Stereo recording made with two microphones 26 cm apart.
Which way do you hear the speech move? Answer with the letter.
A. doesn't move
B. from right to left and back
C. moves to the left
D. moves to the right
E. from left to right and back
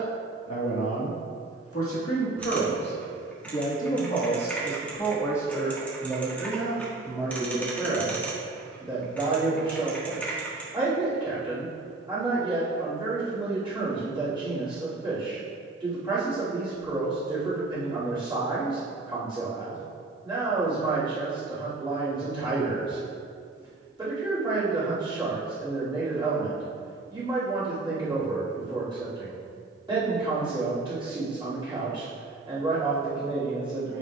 D.